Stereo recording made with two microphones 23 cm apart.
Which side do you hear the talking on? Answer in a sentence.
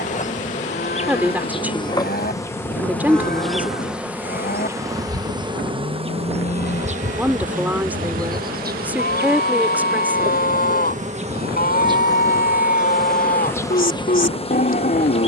You can hear the talking in the centre.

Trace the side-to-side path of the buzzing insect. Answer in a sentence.
You can hear the buzzing insect move from left to right and back again.